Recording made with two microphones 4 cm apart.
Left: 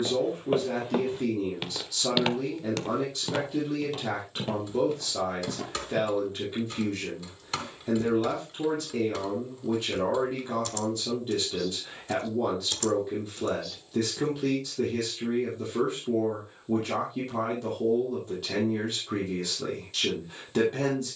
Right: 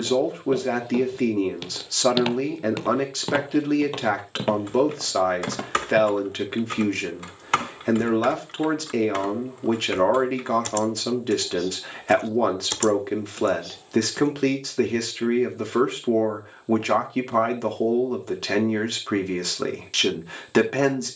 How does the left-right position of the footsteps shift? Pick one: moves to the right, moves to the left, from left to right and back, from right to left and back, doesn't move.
moves to the right.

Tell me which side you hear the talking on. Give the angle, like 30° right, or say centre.
70° right.